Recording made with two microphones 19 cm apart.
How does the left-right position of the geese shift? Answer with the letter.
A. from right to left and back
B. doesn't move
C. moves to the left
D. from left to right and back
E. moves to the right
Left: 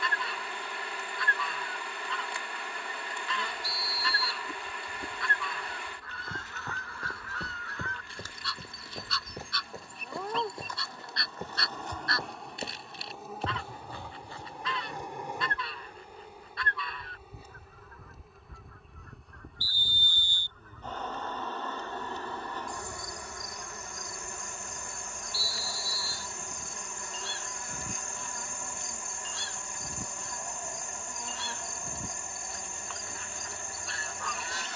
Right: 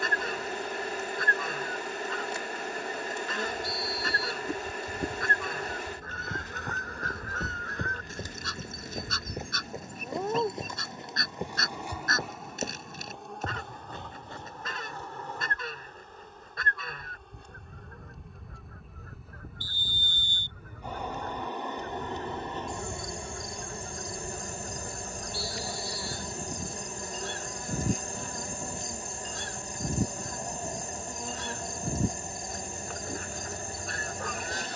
B.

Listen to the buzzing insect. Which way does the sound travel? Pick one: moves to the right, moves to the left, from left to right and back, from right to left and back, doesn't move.
from right to left and back.